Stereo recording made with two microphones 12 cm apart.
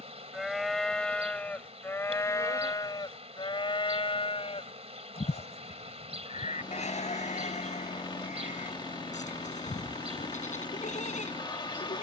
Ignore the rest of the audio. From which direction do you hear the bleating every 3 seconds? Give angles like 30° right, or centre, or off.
20° left, 50° left, 70° left, 80° left.